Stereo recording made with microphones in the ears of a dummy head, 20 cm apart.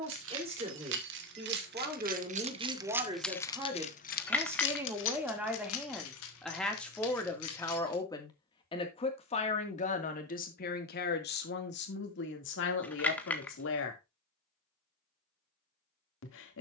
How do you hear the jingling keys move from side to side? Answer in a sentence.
You can hear the jingling keys go from the right side to the left.